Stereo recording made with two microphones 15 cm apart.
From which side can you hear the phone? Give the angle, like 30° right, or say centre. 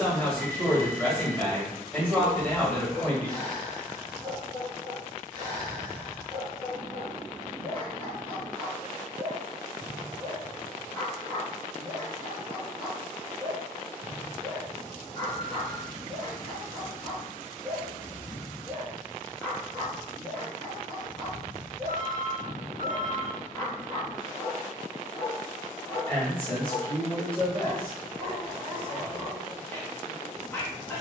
70° right.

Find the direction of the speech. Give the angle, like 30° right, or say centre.
10° left.